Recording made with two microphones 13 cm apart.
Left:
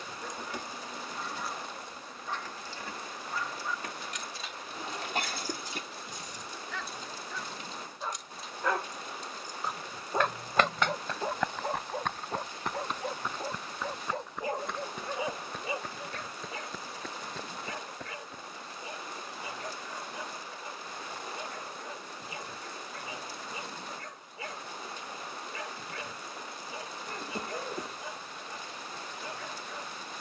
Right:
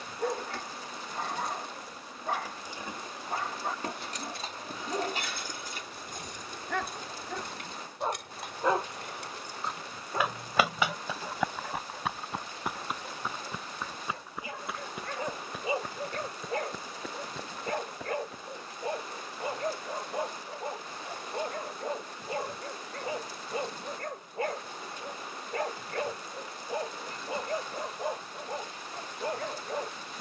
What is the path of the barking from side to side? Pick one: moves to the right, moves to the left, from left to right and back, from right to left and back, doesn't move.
from right to left and back.